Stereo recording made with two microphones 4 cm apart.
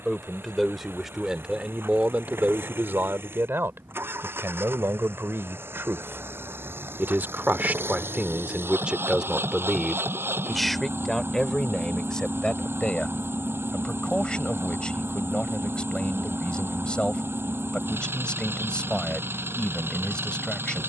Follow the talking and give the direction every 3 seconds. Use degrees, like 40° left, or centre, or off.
20° right, 70° right, 40° right, centre, 20° left, 20° left, 20° left.